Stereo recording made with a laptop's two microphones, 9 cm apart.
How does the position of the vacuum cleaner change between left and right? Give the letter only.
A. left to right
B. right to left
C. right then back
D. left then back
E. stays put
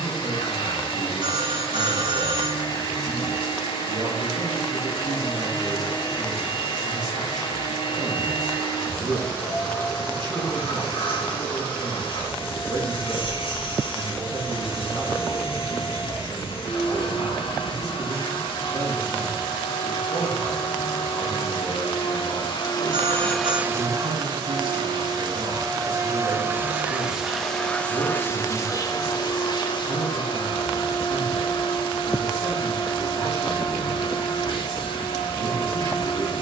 C.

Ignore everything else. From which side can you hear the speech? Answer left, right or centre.
right.